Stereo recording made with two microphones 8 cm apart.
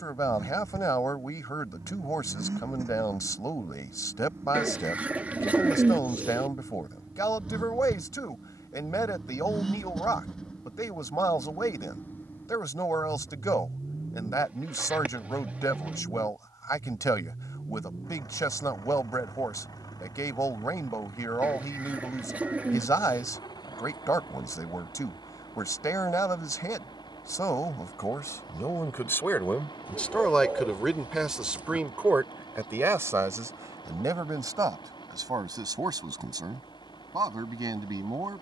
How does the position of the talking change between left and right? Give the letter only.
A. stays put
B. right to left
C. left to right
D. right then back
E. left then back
C.